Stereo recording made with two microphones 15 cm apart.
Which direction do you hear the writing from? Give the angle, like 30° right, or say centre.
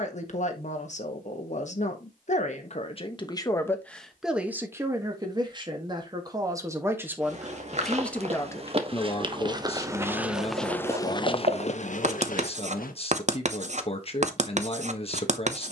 50° right.